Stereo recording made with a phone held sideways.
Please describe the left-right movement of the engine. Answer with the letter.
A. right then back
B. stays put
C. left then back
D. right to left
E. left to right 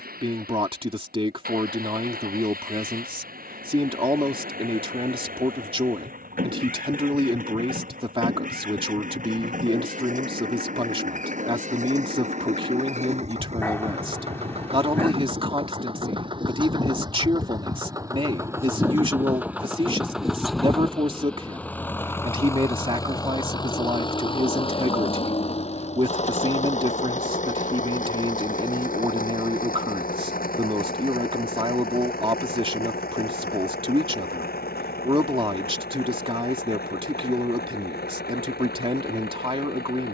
D.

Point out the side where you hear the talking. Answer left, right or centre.
right.